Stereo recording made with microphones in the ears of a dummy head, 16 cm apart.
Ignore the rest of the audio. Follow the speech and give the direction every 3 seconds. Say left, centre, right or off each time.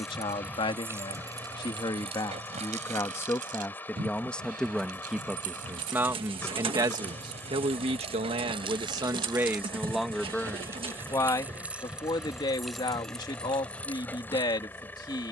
left, centre, right, centre, left.